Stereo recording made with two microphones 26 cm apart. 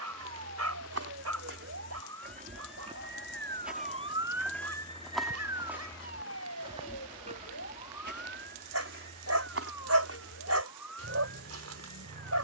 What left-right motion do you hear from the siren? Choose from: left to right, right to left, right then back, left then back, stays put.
right to left.